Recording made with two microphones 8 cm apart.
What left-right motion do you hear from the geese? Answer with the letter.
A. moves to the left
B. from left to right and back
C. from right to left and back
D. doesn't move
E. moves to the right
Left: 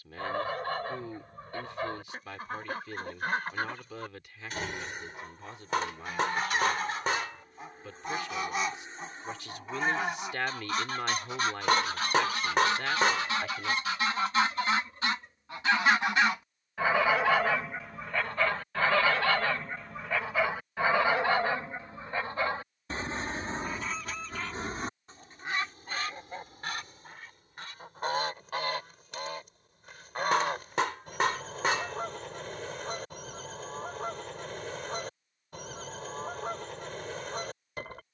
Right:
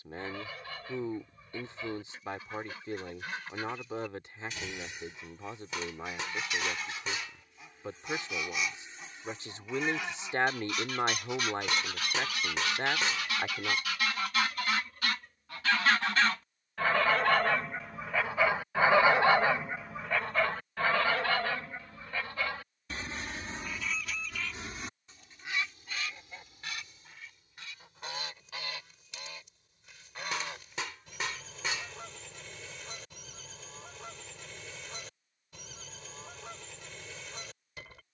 B.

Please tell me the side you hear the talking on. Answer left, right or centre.
right.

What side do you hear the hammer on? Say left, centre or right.
left.